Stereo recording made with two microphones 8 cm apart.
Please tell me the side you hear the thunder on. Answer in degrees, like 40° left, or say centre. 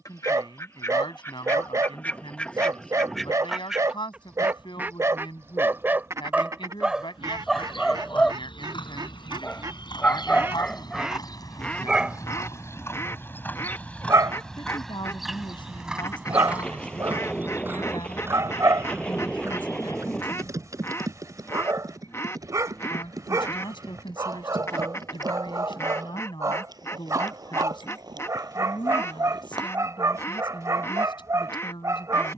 10° left.